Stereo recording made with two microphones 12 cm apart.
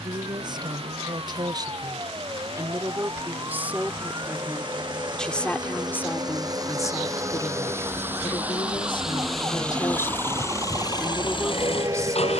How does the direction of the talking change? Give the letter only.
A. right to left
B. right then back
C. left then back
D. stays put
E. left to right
C.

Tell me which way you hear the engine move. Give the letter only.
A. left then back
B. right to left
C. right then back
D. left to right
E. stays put
B.